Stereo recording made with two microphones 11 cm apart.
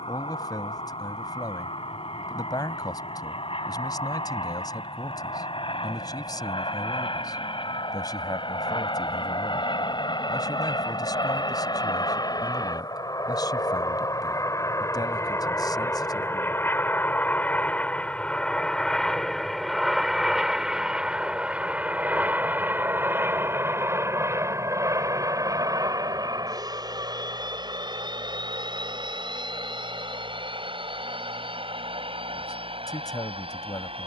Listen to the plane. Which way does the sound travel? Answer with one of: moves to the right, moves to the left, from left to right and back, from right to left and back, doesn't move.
moves to the right.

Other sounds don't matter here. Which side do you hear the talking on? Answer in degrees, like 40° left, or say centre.
40° left.